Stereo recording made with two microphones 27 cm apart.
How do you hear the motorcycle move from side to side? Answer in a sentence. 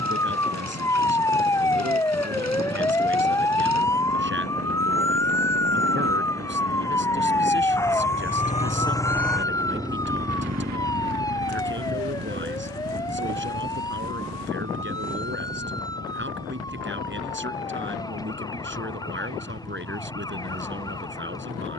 In this clip you hear the motorcycle travel towards the right.